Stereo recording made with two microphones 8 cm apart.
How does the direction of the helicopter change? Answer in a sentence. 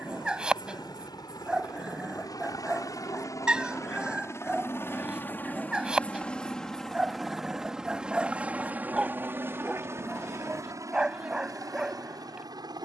You can hear the helicopter move from left to right.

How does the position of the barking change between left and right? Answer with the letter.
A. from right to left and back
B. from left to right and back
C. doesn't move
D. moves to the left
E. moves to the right
C.